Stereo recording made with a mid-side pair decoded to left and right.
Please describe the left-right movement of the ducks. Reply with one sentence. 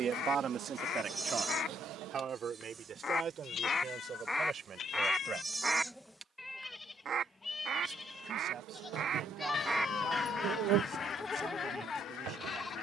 You can hear the ducks go right and come back.